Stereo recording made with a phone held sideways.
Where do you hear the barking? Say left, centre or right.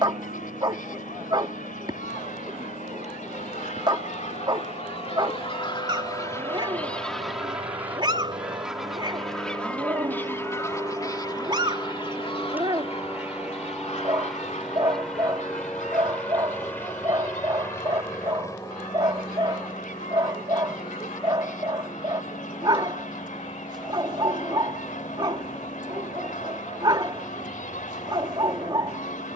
right.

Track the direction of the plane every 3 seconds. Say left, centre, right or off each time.
right, right, right, right, centre, centre, left, left, left, left.